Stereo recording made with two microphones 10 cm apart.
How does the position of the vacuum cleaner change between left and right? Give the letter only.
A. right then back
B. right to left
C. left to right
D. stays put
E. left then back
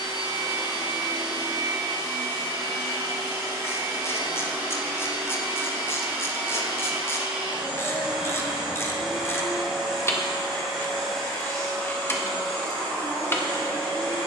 B.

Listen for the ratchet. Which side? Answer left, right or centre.
left.